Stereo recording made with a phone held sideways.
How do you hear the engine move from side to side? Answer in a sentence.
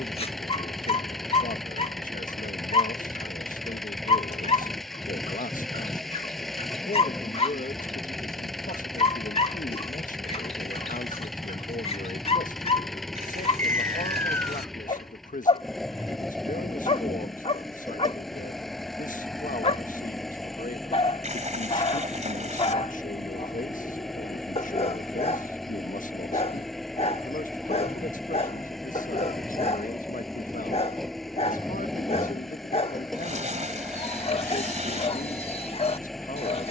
You can hear the engine stay in one place.